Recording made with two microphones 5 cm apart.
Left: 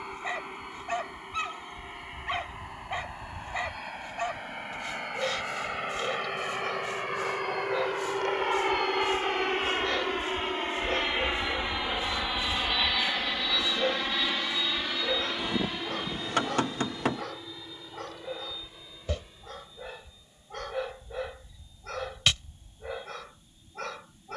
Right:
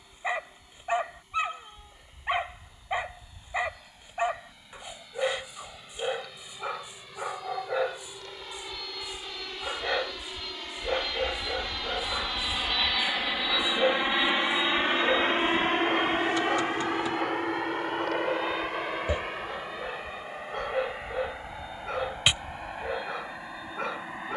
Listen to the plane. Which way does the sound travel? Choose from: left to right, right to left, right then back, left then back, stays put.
left to right.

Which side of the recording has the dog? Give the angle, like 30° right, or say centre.
20° right.